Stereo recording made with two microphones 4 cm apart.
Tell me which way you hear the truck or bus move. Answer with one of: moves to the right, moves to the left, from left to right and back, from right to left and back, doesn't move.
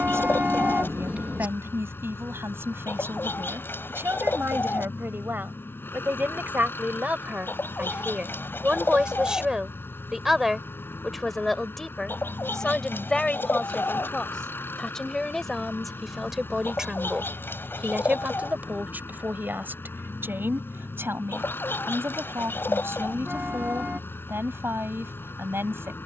doesn't move.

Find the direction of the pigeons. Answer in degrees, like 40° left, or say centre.
60° left.